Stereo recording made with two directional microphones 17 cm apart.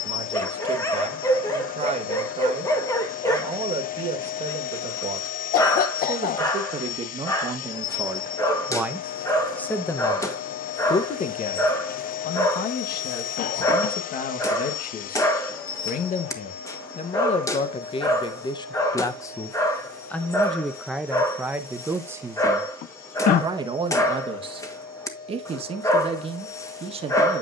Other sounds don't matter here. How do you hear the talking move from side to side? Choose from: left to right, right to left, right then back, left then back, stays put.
left then back.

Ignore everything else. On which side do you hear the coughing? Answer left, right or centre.
left.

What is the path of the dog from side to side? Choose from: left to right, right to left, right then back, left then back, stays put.
stays put.